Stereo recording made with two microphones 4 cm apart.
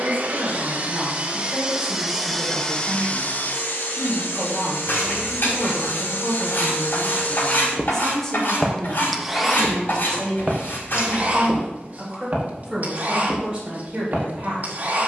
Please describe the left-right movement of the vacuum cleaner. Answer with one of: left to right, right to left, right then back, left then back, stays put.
left then back.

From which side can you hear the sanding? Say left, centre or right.
left.